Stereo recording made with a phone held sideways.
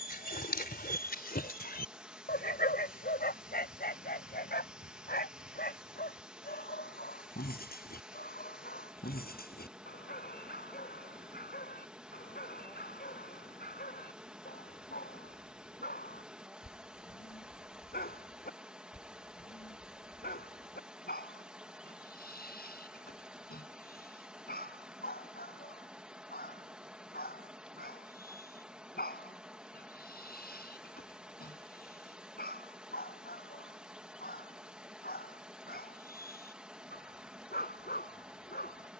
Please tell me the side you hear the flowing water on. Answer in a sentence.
In this clip you hear the flowing water in the centre.